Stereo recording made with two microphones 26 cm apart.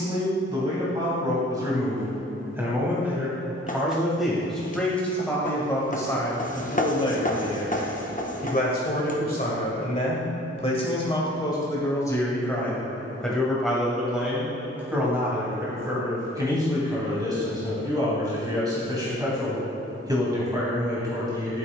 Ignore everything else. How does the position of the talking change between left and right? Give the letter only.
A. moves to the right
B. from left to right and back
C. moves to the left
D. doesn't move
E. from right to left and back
E.